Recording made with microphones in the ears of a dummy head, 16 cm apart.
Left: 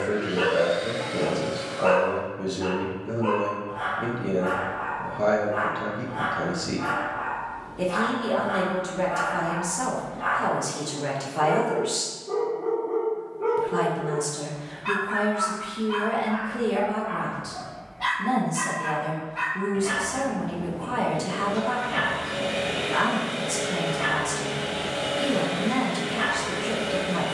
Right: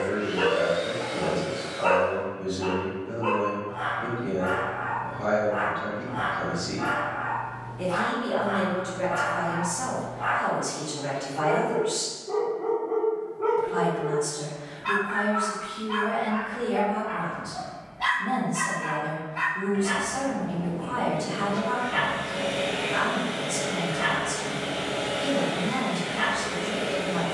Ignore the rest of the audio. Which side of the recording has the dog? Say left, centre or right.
centre.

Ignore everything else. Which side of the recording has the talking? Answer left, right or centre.
left.